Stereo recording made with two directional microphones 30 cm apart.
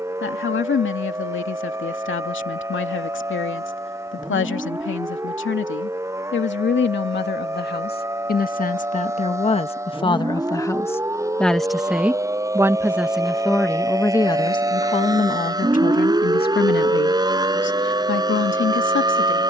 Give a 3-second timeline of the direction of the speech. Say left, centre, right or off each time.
left, left, left, centre, centre, left, left.